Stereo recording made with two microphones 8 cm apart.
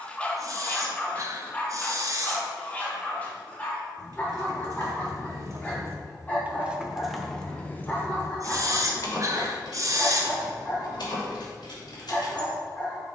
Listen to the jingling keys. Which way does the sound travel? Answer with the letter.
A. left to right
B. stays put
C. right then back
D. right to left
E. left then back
D.